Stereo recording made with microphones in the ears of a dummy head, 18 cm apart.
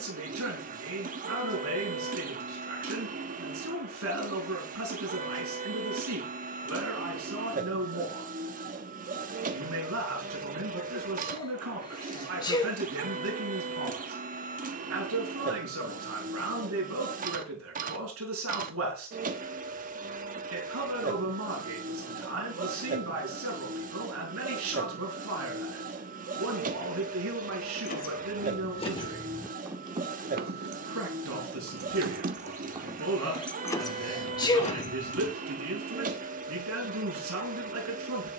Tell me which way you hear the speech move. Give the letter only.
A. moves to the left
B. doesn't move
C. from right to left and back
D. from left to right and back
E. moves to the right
B.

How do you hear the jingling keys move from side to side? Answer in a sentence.
You can hear the jingling keys move from left to right and back again.